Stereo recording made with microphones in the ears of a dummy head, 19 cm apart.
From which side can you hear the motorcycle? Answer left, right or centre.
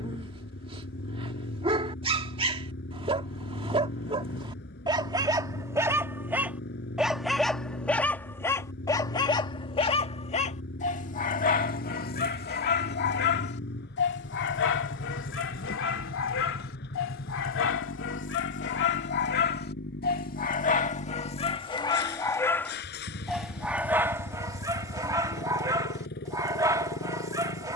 left.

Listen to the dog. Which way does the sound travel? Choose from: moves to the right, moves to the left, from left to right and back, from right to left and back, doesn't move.
from right to left and back.